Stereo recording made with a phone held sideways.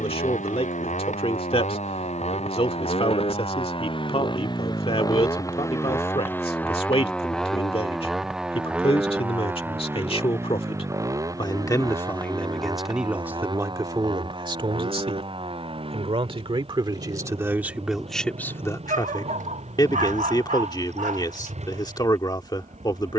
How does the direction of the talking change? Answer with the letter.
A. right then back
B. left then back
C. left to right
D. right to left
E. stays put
A.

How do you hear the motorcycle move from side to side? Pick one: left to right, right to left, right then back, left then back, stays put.
left to right.